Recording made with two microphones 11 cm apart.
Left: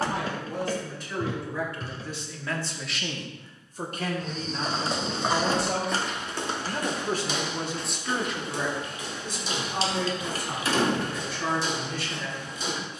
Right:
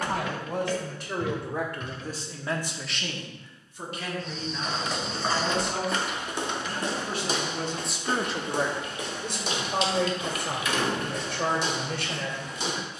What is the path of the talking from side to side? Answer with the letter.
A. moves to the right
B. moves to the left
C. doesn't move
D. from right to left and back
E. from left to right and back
D.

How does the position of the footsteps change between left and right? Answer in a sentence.
In this clip you hear the footsteps move to the right.